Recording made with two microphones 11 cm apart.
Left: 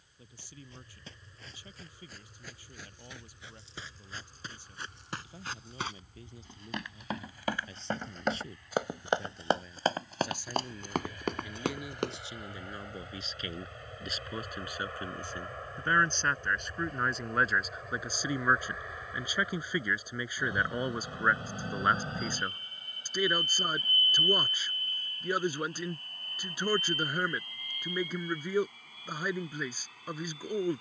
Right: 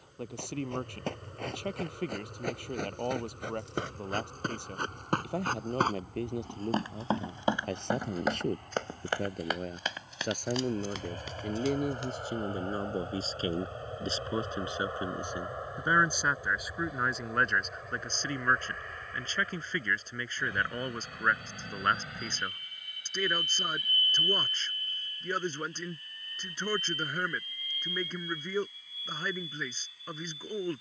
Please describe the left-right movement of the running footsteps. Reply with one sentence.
You can hear the running footsteps travel towards the left.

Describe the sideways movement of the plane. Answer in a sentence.
In this clip you hear the plane travel towards the left.